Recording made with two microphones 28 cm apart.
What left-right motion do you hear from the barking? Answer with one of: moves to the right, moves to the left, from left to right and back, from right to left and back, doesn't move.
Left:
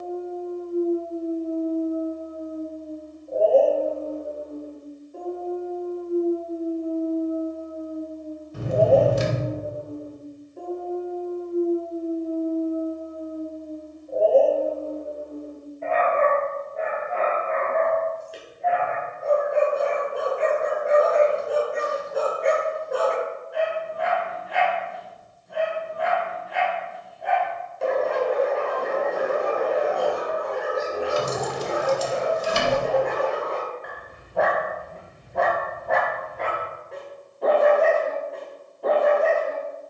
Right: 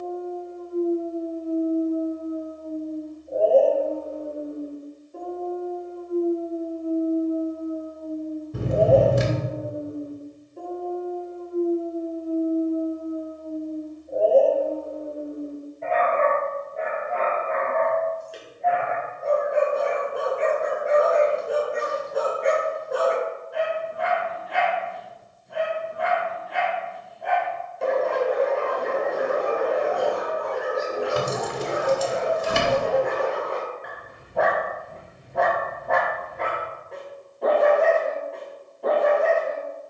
doesn't move.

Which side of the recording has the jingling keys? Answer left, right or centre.
right.